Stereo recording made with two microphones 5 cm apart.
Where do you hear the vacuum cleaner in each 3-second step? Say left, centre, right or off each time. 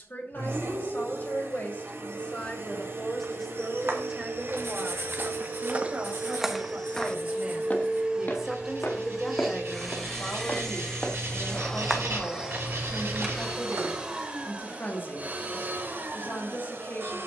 right, right, right, centre, centre, right.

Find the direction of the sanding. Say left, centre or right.
right.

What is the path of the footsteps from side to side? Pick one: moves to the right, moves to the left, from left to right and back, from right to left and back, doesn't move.
from right to left and back.